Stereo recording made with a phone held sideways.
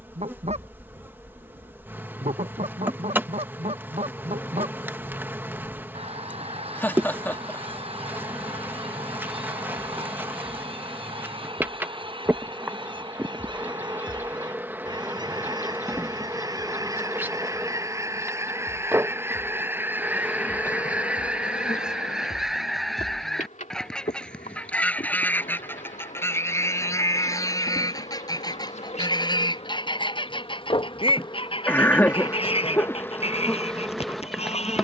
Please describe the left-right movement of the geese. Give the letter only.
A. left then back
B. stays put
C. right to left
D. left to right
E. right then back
C.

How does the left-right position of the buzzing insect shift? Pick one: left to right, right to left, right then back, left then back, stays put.
left then back.